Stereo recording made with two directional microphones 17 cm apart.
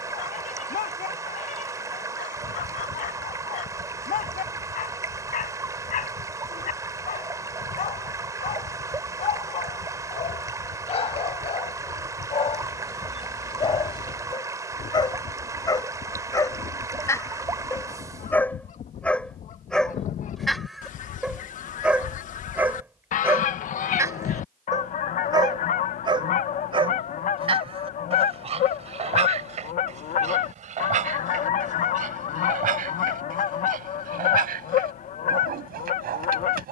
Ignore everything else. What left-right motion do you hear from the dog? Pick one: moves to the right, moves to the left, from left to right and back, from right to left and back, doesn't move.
moves to the right.